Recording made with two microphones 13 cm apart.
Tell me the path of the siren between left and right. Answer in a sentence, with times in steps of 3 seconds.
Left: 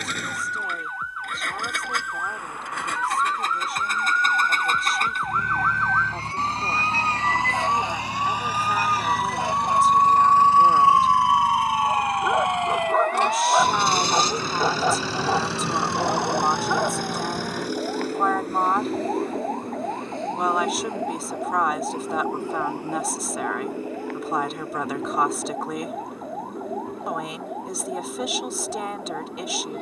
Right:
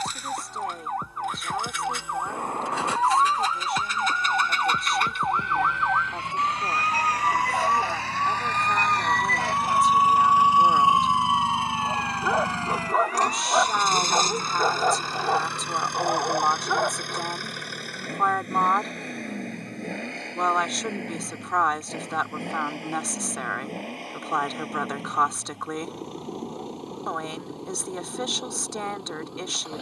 In this clip you hear the siren on the right from 0 s, in the centre from 6 s and on the left from 9 s.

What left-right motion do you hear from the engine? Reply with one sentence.
You can hear the engine go from the left side to the right.